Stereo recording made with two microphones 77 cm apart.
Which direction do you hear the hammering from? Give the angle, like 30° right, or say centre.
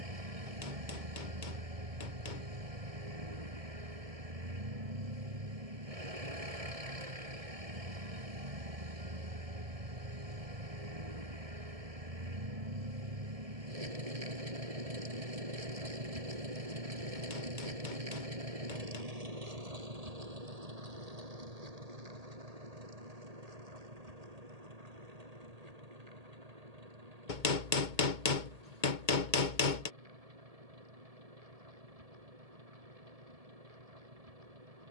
80° left.